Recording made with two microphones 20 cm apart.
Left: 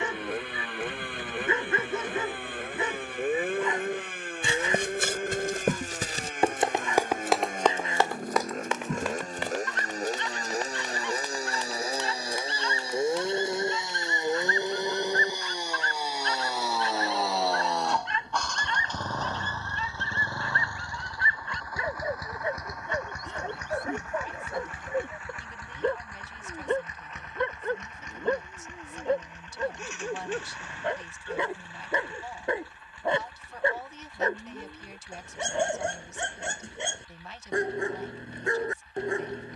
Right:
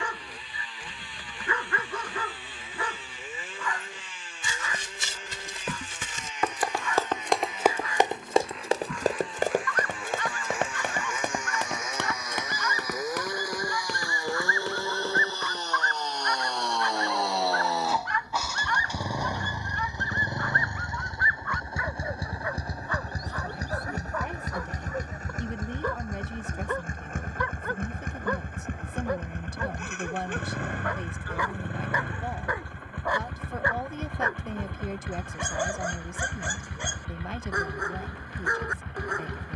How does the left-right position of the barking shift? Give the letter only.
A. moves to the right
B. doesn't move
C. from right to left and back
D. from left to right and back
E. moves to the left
B.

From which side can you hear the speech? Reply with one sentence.
In this clip you hear the speech on the right.